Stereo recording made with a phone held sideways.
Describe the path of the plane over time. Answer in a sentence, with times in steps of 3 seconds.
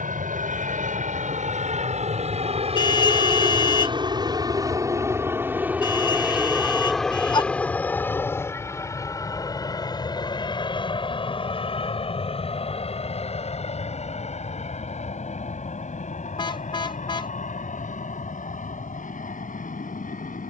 You can hear the plane on the right from 0 s, in the centre from 6 s and on the left from 9 s.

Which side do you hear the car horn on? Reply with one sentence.
You can hear the car horn on the left.